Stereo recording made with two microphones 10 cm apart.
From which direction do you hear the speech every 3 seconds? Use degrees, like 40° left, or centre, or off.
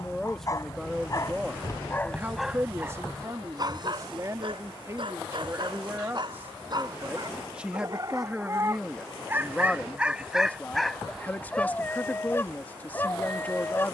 10° right, 30° right, 10° right, 10° left, 20° left.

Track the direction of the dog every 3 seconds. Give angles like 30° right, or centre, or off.
20° left, 50° right, 40° right, centre, 20° left.